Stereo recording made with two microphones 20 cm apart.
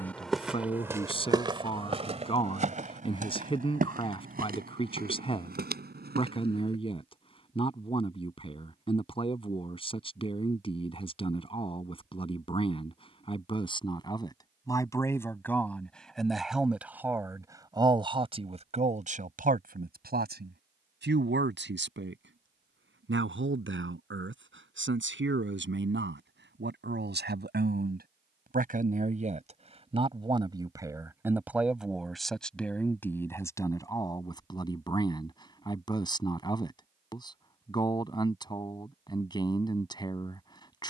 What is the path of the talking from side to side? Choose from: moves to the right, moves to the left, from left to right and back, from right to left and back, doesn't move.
from left to right and back.